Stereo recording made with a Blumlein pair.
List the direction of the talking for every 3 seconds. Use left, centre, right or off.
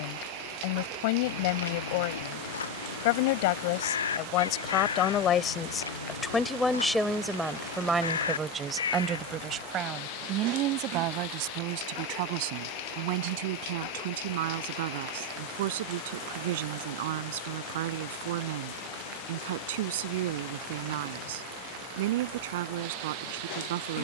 left, left, centre, right, right, right, right, right.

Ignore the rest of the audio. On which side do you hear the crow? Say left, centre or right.
left.